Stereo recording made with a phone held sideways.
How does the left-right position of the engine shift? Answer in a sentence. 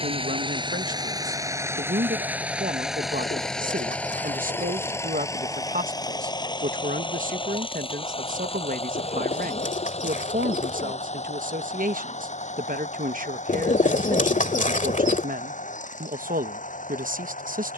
You can hear the engine move from right to left.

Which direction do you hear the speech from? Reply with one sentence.
You can hear the speech on the right.